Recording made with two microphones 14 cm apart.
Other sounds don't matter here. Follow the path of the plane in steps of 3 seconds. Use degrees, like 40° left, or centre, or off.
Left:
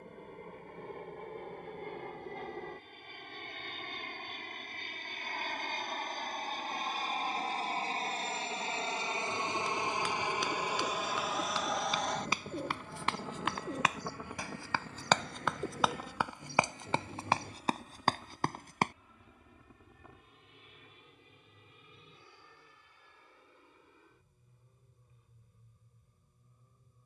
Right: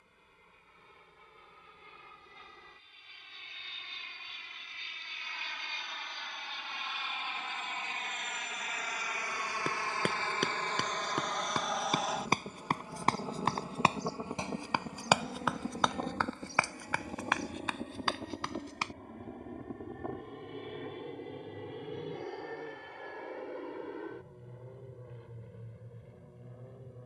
60° left, 50° left, 40° left, 10° left, 20° right, 40° right, 50° right, 60° right, 70° right.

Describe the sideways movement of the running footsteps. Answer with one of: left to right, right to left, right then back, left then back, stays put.
right to left.